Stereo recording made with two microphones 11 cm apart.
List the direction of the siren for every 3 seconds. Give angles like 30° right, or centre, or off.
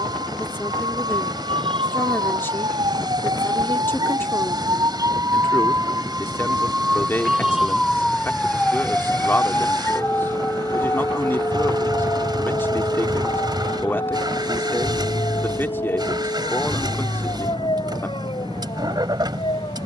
60° right, 40° right, 10° right, 20° left, 40° left, 50° left, 50° left.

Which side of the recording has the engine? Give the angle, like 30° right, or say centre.
50° right.